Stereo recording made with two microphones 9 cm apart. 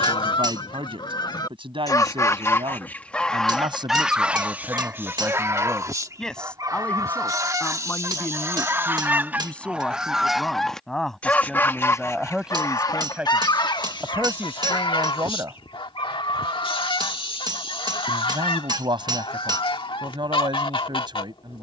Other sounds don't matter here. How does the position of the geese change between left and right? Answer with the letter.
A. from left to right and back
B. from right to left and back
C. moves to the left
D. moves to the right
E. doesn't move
A.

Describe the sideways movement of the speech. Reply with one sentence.
In this clip you hear the speech move from right to left and back again.